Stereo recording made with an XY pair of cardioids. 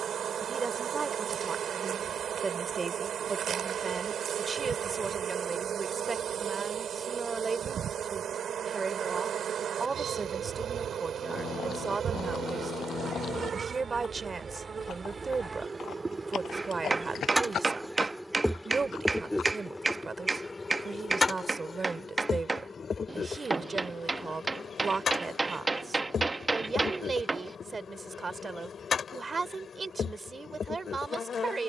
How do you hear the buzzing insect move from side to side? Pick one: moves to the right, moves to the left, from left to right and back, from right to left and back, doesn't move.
moves to the left.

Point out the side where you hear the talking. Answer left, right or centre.
right.